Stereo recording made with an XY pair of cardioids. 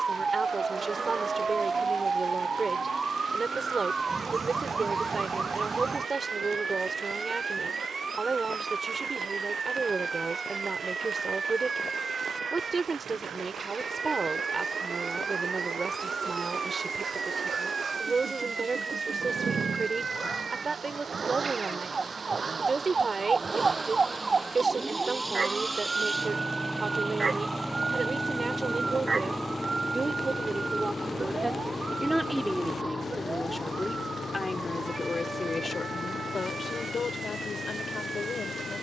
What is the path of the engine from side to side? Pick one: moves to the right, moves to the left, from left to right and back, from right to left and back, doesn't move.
moves to the left.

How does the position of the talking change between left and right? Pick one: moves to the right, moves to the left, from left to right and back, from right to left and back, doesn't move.
moves to the left.